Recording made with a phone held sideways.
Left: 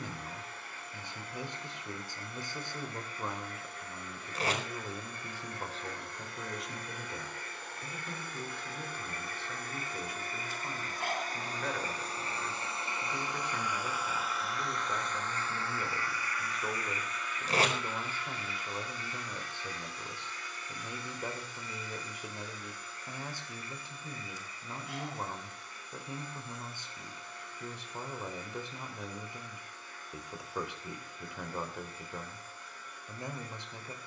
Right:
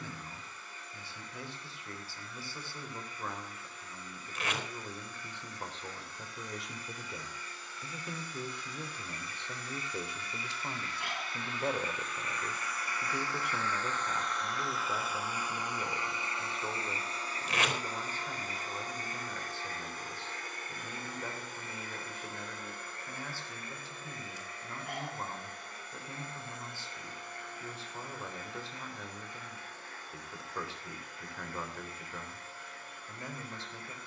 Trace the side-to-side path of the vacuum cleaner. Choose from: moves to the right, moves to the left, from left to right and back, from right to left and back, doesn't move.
moves to the right.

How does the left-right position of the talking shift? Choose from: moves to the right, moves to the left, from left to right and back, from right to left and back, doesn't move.
from left to right and back.